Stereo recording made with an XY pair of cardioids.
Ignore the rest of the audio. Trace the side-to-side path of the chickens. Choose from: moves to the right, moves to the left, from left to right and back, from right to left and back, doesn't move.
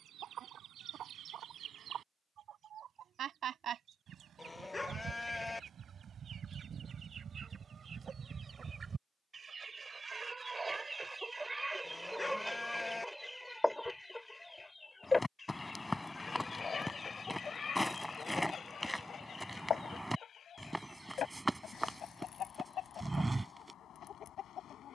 moves to the left.